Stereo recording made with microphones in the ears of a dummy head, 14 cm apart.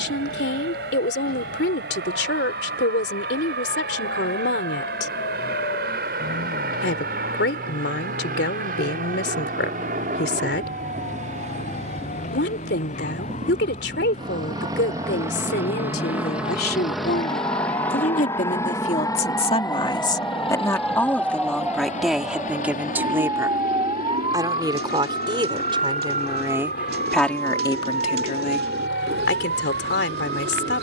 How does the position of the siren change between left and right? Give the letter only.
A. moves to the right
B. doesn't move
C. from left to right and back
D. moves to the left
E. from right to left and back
A.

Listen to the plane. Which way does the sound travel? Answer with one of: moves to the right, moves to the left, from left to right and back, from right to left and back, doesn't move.
moves to the left.